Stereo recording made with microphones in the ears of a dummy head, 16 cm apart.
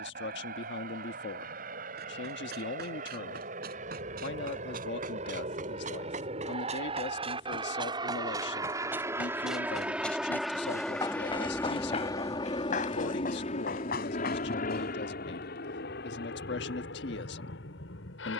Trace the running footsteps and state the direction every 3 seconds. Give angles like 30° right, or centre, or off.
60° right, 50° right, 30° right, 10° left, 50° left, off.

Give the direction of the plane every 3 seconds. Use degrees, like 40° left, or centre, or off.
50° right, 40° right, 30° right, centre, 30° left, 60° left.